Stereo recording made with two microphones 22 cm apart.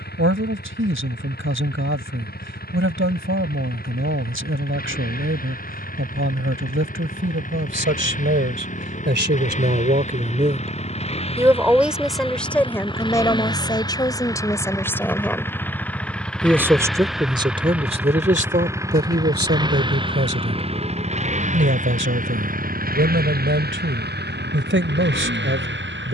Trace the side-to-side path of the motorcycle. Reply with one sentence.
In this clip you hear the motorcycle move from left to right.